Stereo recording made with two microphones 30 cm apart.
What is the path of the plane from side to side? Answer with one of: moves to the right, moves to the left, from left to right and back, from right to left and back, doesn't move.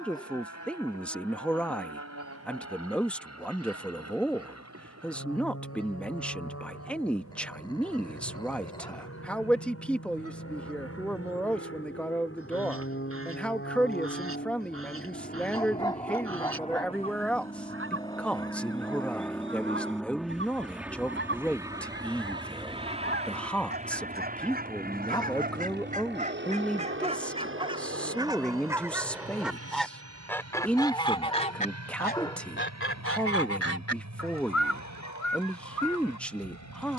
moves to the right.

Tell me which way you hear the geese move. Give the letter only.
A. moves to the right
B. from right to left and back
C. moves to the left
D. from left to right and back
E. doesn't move
C.